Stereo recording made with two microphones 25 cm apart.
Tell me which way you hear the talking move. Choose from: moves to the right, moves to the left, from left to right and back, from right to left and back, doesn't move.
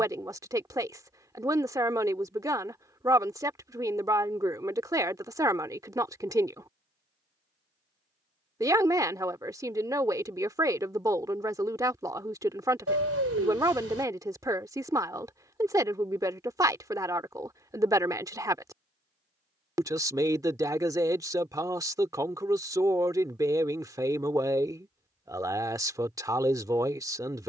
doesn't move.